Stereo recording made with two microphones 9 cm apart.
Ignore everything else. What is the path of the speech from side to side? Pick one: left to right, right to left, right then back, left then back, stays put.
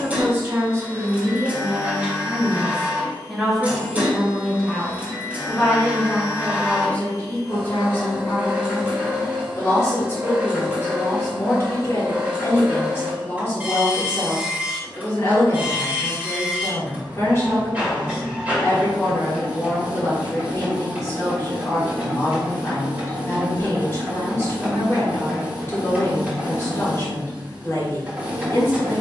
right to left.